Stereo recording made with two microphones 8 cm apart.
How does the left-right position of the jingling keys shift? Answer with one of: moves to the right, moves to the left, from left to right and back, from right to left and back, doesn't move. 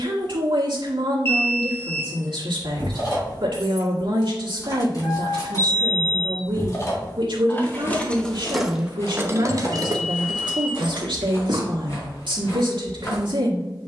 moves to the right.